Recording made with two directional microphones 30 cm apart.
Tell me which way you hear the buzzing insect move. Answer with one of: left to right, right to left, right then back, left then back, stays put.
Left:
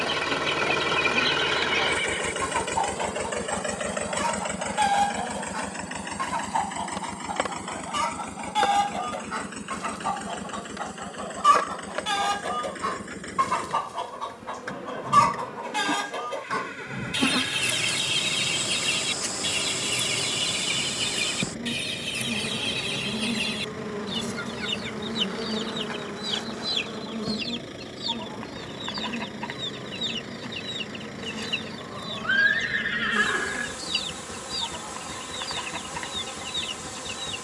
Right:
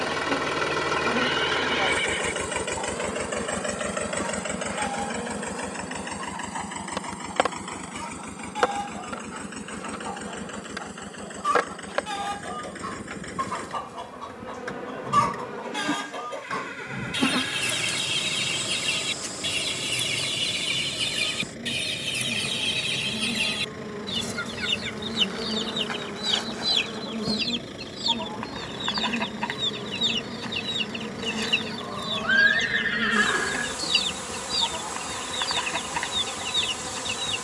left then back.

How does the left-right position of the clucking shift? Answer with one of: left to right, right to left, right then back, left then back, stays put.
left to right.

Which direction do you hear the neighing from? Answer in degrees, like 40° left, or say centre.
10° right.